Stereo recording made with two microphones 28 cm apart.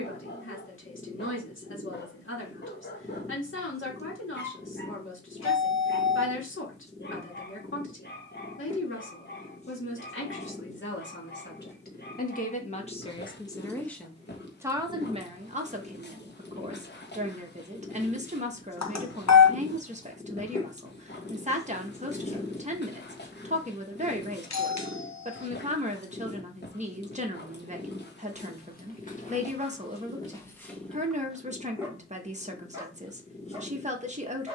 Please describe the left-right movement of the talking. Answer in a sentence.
You can hear the talking go from the left side to the right.